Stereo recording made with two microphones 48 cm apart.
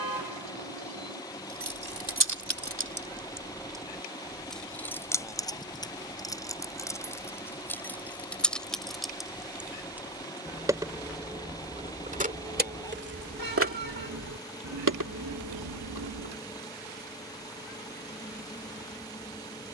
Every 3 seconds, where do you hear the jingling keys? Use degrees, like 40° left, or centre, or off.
40° right, centre, centre, 10° right, 30° right, 50° right, off.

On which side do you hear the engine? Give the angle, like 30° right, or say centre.
10° left.